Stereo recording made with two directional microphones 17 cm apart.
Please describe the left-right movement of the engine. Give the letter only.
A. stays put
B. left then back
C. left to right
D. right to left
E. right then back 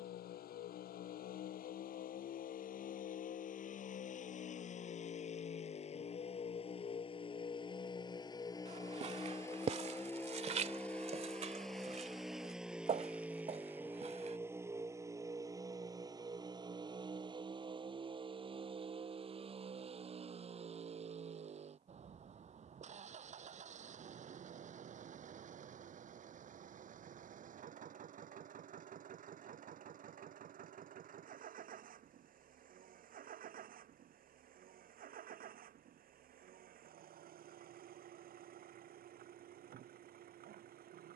C.